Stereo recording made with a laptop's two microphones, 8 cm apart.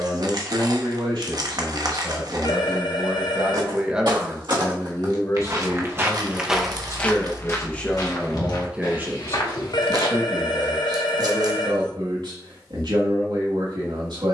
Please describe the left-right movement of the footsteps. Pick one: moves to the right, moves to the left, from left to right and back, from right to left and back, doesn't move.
moves to the left.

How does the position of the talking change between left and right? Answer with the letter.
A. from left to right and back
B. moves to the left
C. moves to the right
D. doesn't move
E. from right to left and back
E.